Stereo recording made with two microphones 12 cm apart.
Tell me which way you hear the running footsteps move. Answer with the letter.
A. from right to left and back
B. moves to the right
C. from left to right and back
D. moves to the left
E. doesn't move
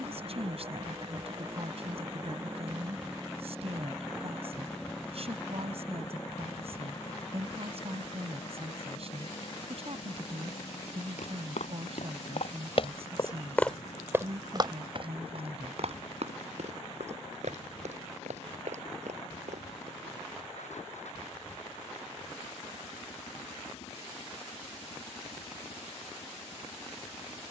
B.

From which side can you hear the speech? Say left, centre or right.
right.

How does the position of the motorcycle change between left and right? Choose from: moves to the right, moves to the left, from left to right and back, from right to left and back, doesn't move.
moves to the left.